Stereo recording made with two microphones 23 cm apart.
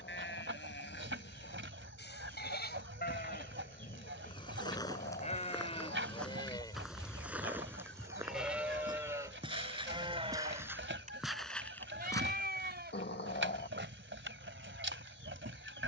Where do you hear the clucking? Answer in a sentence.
In this clip you hear the clucking on the right.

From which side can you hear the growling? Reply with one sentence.
You can hear the growling on the left.